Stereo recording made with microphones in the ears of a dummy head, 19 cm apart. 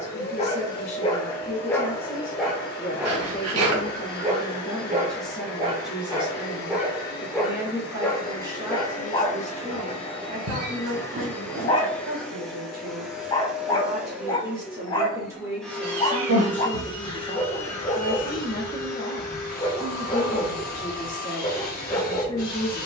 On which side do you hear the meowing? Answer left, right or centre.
right.